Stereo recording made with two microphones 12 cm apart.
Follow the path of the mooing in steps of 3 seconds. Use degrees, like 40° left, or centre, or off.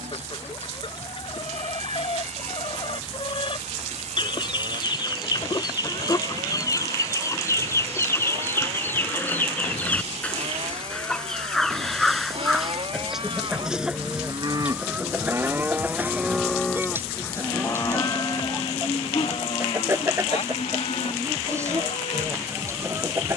80° right, 70° right, 70° right, 60° right, 50° right, centre, 50° left, 70° left.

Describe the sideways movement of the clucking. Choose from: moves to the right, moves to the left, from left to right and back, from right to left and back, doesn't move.
moves to the right.